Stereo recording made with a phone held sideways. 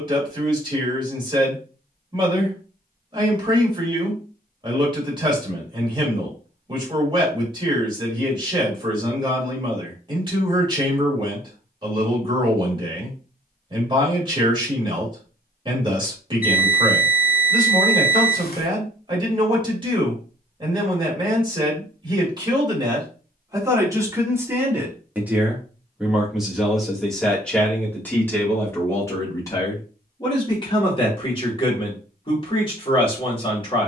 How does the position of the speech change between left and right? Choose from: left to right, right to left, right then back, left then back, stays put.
right to left.